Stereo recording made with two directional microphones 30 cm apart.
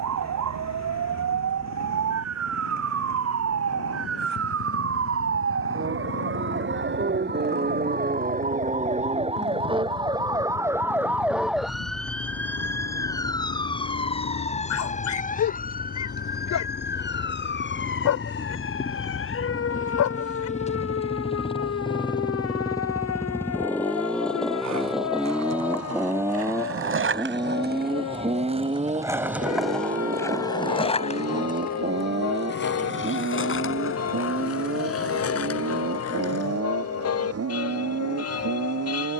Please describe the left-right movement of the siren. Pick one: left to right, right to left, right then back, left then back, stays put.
right to left.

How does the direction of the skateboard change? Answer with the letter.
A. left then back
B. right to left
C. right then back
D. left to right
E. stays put
B.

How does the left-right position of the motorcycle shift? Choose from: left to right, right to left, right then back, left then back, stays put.
left to right.